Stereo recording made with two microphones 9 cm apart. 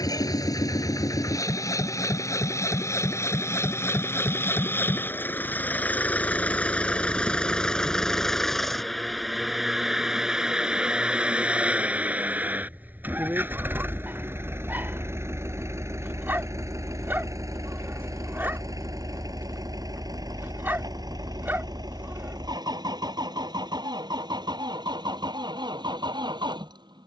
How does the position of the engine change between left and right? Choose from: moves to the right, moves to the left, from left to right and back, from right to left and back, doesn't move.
moves to the right.